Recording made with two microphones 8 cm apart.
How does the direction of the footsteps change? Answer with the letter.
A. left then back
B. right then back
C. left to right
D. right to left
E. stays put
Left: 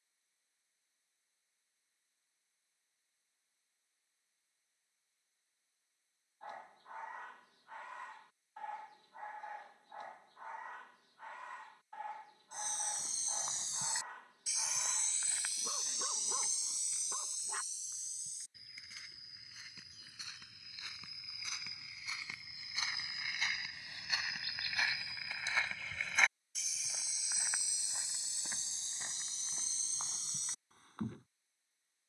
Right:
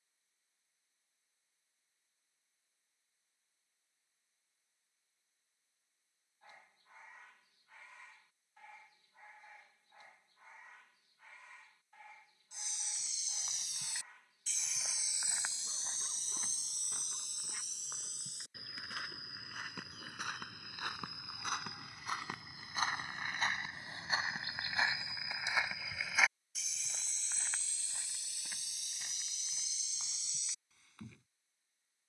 B.